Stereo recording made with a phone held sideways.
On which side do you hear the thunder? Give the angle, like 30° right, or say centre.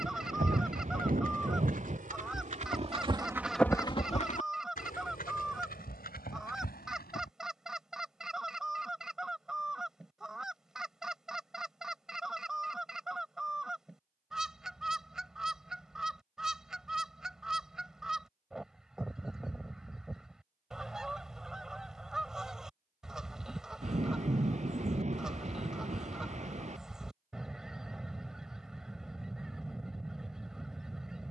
50° right.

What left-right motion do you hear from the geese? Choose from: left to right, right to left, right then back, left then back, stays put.
stays put.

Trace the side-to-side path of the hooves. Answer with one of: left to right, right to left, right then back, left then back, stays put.
right to left.